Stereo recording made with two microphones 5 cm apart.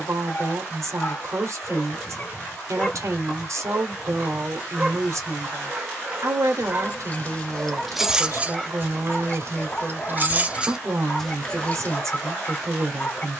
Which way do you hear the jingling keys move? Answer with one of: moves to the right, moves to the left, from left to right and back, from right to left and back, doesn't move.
from left to right and back.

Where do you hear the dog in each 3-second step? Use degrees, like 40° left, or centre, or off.
30° left, 20° right, 10° right, 30° left, 30° left.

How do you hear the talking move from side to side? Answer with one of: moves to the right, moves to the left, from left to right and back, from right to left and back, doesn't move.
doesn't move.